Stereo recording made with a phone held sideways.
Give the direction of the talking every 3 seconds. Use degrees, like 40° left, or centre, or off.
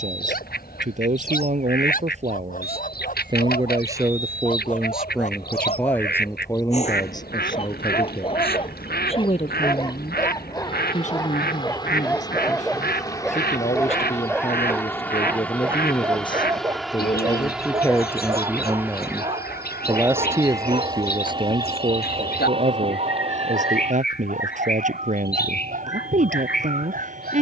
50° right, 10° right, 20° left, 40° left, 40° left, 30° left, 10° right, 40° right, 50° right.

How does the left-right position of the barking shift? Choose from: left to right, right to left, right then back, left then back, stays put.
left to right.